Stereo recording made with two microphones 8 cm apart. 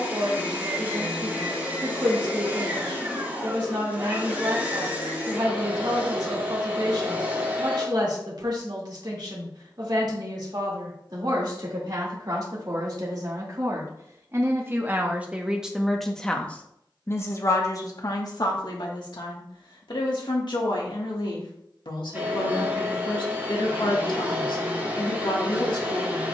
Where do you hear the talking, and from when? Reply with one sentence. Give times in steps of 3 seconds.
In this clip you hear the talking on the right from 0 s, in the centre from 15 s and on the left from 18 s.